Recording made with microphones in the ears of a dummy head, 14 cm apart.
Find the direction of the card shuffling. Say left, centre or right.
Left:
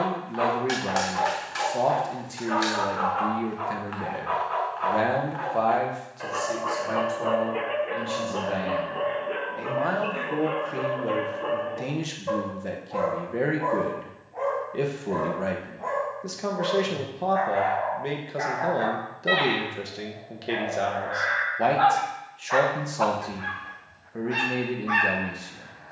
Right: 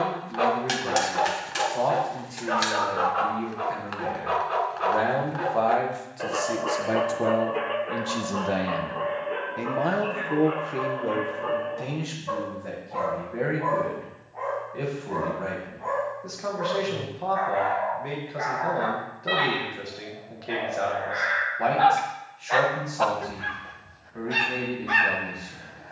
right.